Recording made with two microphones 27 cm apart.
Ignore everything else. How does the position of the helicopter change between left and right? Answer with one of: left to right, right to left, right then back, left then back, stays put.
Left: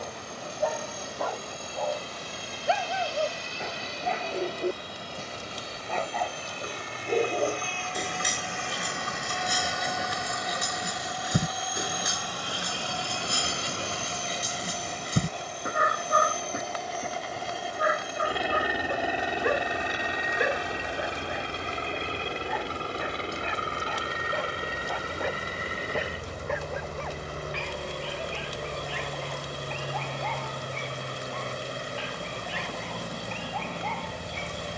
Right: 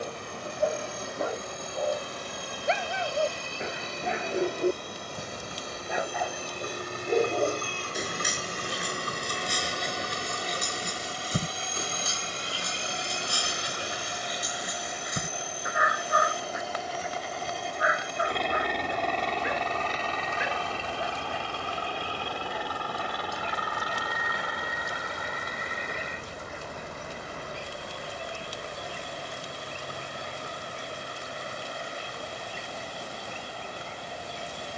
right to left.